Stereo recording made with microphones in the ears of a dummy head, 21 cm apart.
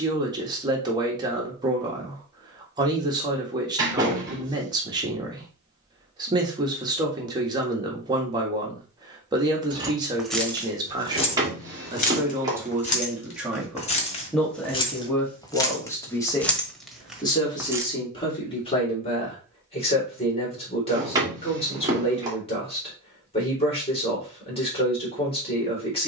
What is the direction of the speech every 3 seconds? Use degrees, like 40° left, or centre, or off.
20° right, 20° right, 20° right, 20° right, centre, 20° left, 30° left, 30° left, 30° left.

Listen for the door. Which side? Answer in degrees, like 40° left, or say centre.
20° right.